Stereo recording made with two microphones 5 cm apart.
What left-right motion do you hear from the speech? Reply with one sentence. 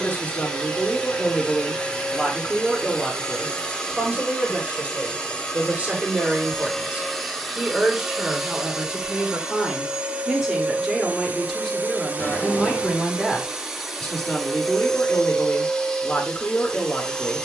You can hear the speech move from left to right and back again.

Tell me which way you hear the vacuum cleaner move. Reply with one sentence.
In this clip you hear the vacuum cleaner move from left to right and back again.